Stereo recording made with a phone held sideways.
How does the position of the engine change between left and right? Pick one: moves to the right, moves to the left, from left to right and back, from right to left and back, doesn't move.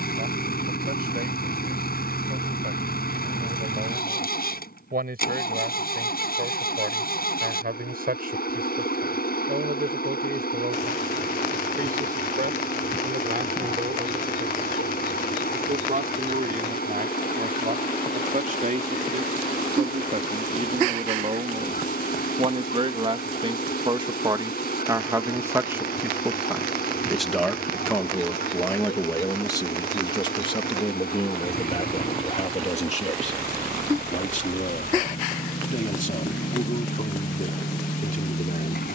doesn't move.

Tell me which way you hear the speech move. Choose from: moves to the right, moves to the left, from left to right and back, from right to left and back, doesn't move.
moves to the left.